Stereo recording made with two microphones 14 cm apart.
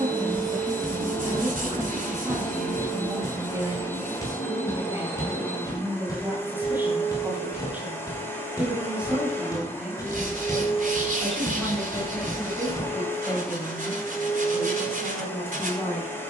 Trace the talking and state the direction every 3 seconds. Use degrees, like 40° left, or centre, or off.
30° right, 20° right, 10° right, centre, 10° left, 20° left.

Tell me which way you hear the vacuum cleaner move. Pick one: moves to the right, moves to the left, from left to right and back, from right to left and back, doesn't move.
doesn't move.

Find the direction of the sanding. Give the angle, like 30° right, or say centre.
70° right.